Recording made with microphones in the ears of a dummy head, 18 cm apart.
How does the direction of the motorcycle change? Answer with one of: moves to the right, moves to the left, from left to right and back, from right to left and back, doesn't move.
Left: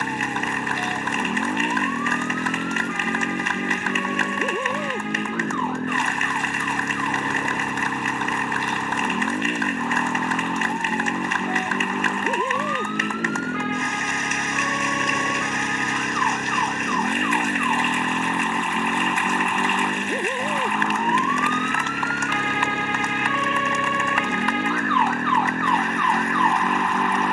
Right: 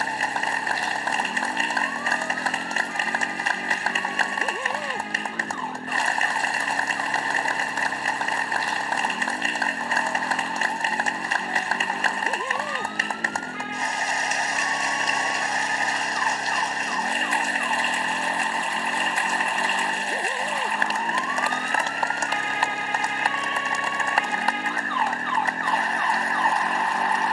doesn't move.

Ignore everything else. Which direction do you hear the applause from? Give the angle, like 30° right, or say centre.
30° right.